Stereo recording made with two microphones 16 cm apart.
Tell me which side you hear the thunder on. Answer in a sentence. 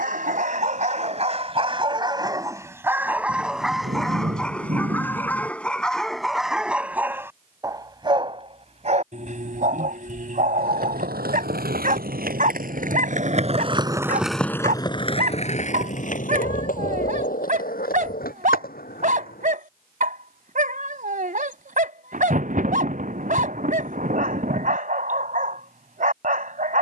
In this clip you hear the thunder on the right.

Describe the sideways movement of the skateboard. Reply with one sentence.
You can hear the skateboard move from right to left.